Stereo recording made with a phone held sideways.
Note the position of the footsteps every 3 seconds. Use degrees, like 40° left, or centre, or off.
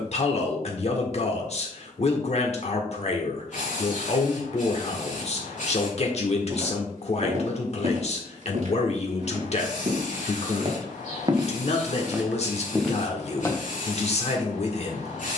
off, off, 60° right, 40° right, centre.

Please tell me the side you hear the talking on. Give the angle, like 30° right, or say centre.
50° left.